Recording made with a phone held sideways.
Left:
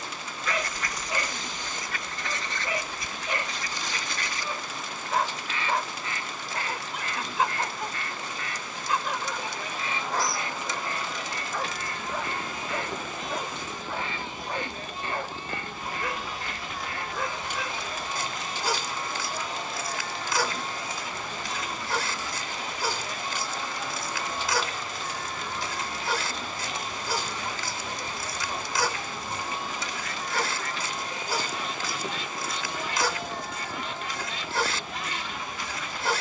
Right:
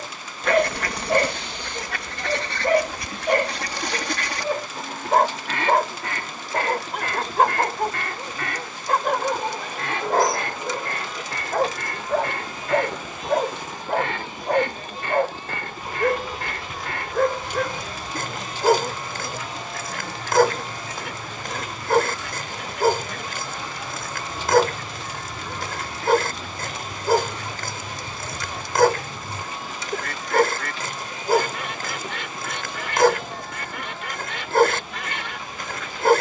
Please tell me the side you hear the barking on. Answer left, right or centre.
right.